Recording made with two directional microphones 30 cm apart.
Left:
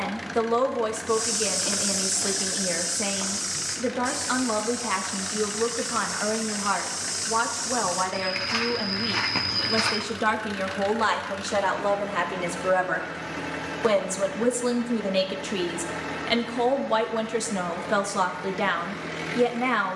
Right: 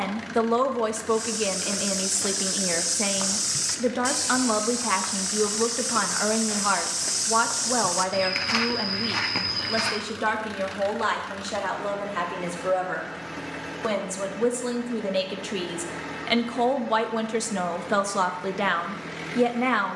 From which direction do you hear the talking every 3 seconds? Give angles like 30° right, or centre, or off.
20° right, 20° right, 20° right, 10° left, 20° left, 10° right, 10° right.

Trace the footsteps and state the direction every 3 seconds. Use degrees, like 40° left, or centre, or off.
centre, 50° right, 40° right, centre, off, off, off.